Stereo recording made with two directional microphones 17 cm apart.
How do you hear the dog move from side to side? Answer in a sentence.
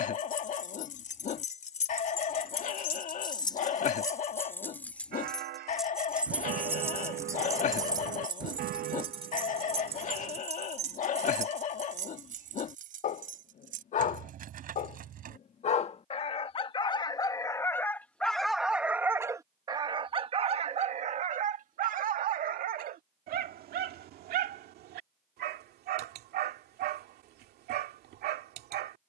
In this clip you hear the dog move from left to right.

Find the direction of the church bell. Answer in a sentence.
You can hear the church bell on the right.